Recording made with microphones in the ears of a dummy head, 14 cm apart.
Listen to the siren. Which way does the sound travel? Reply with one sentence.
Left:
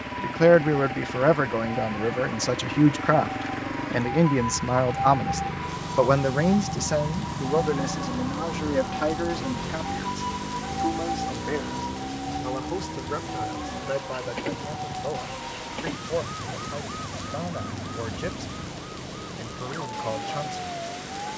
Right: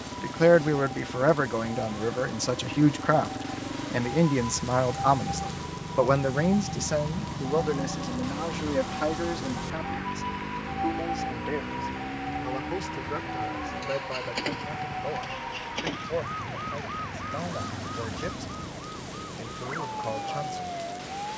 You can hear the siren move to the right.